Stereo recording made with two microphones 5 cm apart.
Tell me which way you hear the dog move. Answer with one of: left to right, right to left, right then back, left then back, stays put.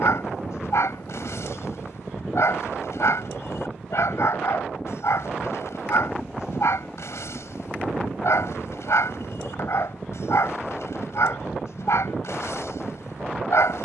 stays put.